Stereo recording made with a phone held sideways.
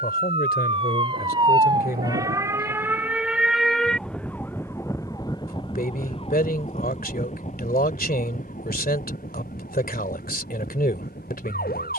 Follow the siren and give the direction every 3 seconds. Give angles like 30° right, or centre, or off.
30° right, 10° left, 50° left, 70° left.